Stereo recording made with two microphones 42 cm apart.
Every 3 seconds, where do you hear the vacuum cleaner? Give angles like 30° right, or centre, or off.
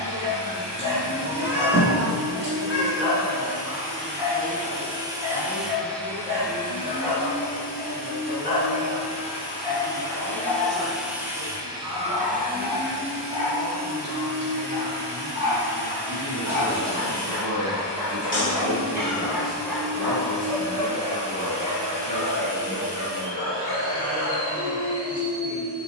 60° right, 20° right, 20° left, centre, 30° right, 70° right, 80° right, 80° right, 80° right.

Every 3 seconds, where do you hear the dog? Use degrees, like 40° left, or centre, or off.
20° right, 20° right, 20° right, 20° right, 20° right, 10° right, centre, 30° left, 40° left.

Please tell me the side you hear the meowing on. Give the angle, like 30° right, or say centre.
30° left.